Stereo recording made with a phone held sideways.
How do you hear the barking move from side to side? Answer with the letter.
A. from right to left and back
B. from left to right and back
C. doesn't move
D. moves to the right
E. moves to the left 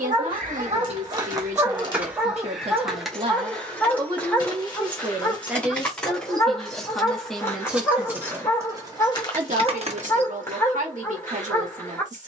E.